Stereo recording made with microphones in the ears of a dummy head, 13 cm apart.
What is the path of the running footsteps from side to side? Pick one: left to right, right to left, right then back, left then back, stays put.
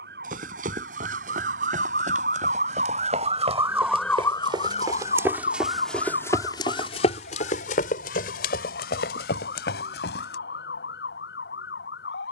right to left.